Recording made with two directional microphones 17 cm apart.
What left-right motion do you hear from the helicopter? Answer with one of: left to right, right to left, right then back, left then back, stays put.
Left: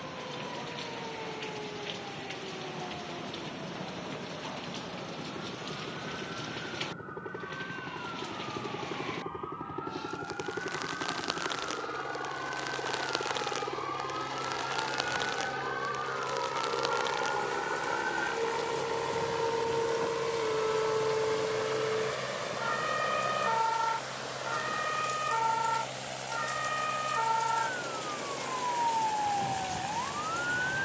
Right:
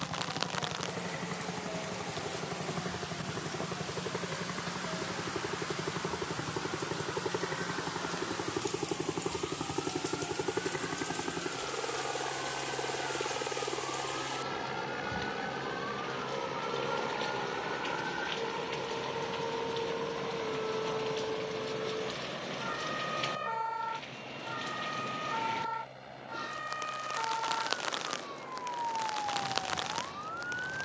right to left.